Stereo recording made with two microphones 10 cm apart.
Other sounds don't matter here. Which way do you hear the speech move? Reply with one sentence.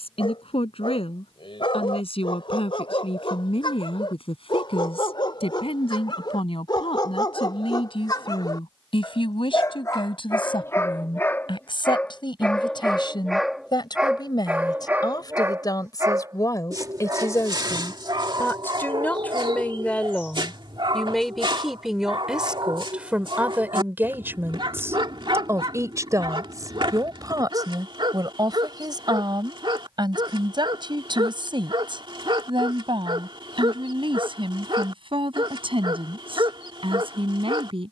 In this clip you hear the speech move to the right.